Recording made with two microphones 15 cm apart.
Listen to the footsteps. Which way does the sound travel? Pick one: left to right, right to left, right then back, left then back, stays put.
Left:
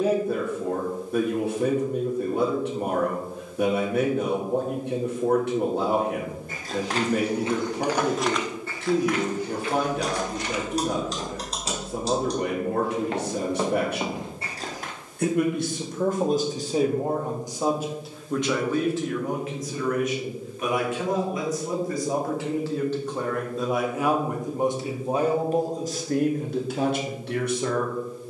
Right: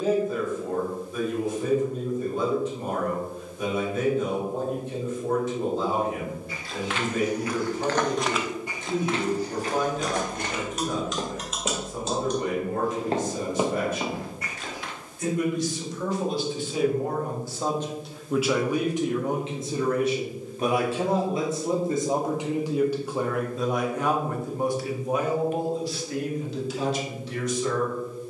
right then back.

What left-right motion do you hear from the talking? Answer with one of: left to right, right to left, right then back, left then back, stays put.
right then back.